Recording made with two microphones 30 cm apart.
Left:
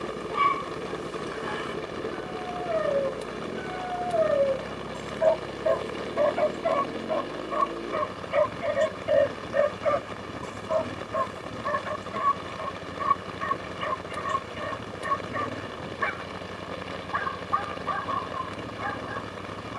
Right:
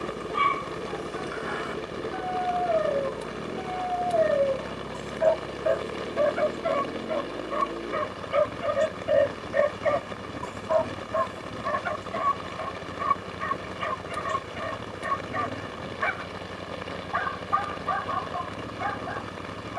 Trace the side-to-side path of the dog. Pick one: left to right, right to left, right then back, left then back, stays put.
right then back.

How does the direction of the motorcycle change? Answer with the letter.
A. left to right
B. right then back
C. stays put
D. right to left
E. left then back
C.